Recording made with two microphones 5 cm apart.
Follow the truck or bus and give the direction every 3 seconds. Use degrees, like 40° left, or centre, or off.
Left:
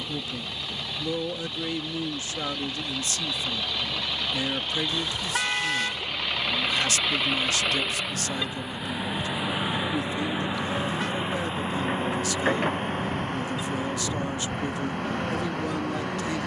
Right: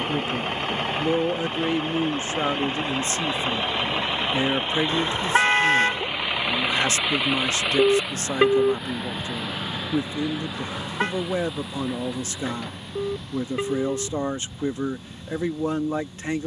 40° right, 30° right, 10° right, 20° left, 50° left, 60° left.